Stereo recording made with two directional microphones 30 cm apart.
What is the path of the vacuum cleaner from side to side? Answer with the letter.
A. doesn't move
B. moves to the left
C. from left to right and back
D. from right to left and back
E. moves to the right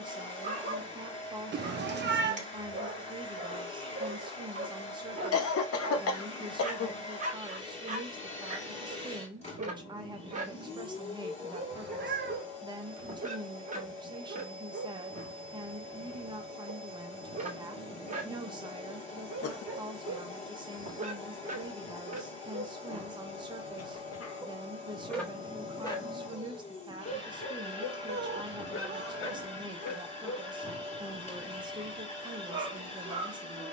A.